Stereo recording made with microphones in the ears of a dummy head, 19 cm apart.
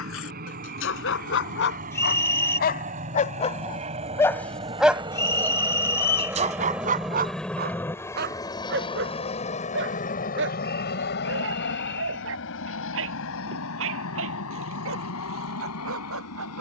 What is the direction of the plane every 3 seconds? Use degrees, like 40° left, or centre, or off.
50° right, 30° right, 10° left, 40° left, 60° left, 70° left.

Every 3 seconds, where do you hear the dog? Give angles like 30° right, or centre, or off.
60° left, 20° left, 40° right, 60° right, 70° right, 70° right.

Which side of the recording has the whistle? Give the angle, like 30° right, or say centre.
10° left.